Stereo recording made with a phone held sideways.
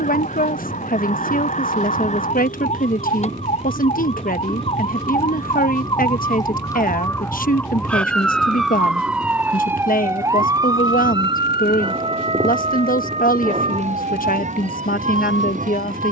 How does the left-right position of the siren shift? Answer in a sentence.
You can hear the siren travel towards the right.